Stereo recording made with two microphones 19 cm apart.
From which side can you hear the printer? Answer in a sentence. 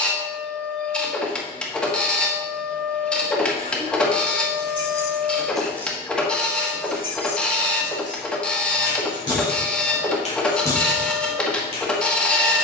You can hear the printer in the centre.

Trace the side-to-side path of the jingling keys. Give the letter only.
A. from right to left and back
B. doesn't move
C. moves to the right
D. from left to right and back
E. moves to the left
A.